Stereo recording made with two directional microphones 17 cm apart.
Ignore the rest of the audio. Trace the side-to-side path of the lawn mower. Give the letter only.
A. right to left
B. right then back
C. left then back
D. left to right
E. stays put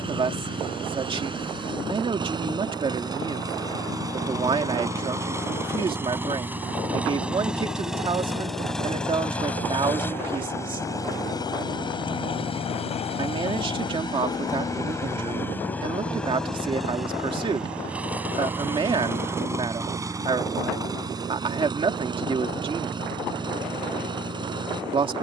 C.